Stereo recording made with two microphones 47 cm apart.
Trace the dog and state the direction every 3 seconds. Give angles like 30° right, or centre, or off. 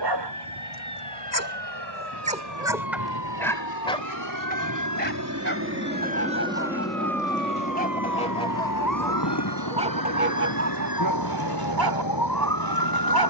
30° right, 20° left, 20° left, 30° right, 50° right.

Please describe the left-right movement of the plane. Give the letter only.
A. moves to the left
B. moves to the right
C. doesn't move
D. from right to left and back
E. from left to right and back
A.